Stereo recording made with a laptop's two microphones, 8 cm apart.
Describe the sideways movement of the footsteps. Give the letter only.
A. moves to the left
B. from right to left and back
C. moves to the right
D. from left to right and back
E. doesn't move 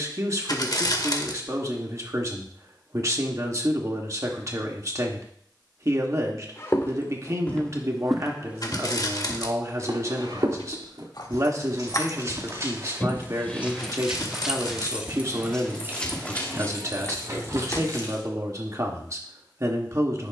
D.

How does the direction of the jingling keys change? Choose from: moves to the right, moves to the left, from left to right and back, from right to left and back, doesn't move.
moves to the right.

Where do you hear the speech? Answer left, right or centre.
right.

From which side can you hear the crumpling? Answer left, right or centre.
left.